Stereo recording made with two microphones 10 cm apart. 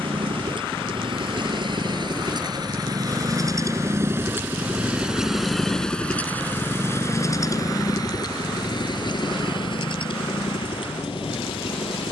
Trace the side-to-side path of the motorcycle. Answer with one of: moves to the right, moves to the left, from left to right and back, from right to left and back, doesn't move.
moves to the left.